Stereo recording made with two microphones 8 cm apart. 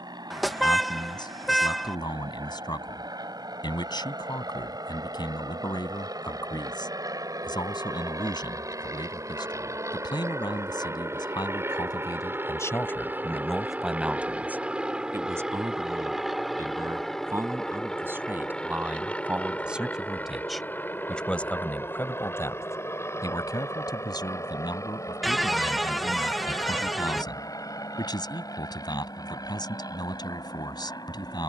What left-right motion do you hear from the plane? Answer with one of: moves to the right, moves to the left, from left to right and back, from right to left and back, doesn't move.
moves to the left.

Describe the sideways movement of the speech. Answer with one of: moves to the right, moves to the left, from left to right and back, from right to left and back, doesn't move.
from left to right and back.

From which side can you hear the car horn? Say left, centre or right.
centre.